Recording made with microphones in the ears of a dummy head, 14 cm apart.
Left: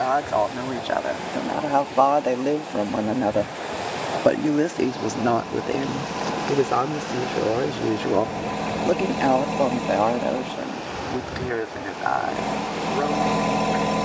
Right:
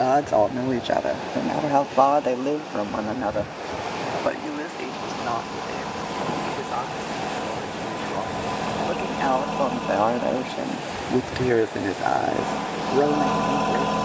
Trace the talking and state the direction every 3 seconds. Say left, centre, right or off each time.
centre, left, left, centre, right.